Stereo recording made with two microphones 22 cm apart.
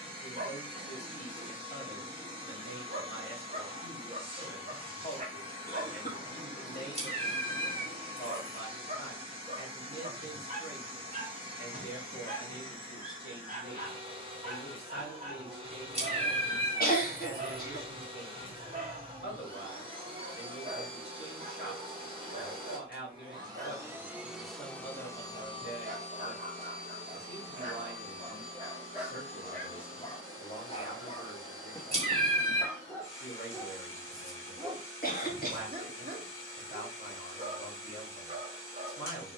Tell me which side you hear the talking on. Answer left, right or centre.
left.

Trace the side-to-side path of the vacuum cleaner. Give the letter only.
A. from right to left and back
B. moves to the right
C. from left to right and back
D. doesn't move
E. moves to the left
E.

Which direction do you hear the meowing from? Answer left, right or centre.
right.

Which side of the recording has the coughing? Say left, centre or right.
left.